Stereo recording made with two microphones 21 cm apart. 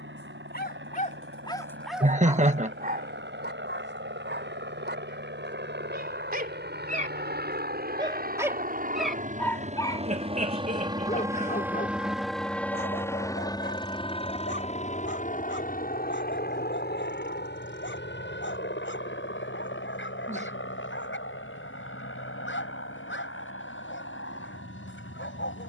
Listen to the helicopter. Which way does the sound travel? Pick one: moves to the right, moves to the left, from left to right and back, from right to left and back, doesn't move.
moves to the left.